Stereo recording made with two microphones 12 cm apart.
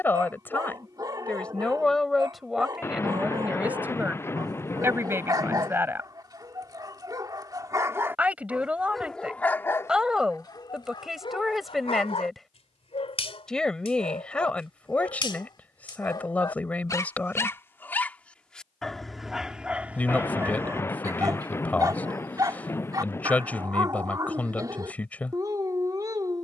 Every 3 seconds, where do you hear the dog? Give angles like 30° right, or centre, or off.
30° right, 30° right, 30° right, 30° left, 50° left, 30° left, 10° right, 30° right, 30° right.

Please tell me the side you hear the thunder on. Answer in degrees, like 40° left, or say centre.
20° left.